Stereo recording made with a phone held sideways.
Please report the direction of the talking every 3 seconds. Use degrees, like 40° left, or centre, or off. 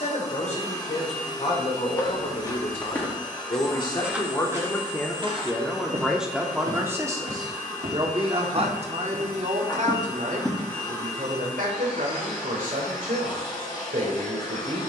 50° left, 20° left, 20° right, 60° right, 70° right.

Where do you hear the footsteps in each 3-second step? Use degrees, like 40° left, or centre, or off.
20° left, 20° right, 60° right, 10° right, off.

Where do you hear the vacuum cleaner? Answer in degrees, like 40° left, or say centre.
30° left.